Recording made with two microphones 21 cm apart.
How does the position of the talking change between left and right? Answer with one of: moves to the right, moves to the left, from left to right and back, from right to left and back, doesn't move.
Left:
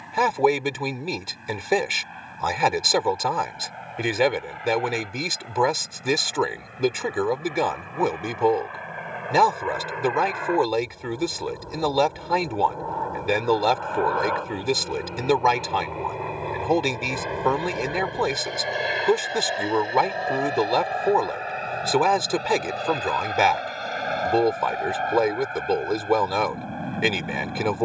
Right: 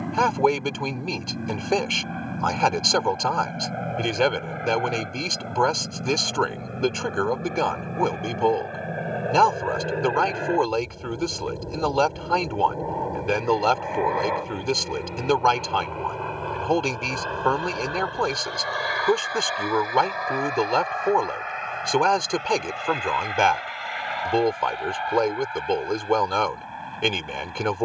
doesn't move.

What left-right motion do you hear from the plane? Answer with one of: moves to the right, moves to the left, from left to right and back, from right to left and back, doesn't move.
moves to the left.